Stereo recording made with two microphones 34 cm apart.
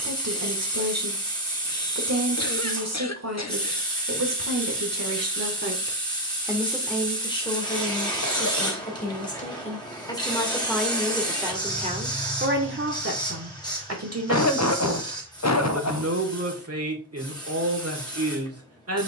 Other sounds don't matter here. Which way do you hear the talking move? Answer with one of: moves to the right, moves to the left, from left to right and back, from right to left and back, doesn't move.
from right to left and back.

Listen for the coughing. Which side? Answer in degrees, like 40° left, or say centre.
50° left.